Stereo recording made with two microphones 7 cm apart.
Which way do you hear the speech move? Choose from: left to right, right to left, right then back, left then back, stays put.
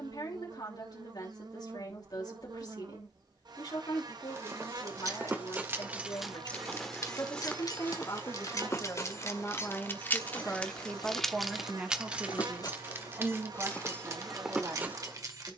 left to right.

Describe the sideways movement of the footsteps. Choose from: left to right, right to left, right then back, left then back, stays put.
left then back.